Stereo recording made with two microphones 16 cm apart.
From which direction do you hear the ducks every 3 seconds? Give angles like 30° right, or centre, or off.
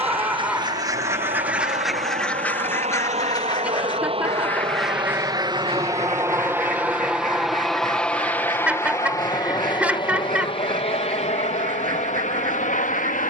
10° right, centre, 60° right, 60° right, 60° right.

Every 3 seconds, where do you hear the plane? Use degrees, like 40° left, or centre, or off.
50° right, 30° right, centre, 30° left, 50° left.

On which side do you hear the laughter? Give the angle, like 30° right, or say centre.
10° right.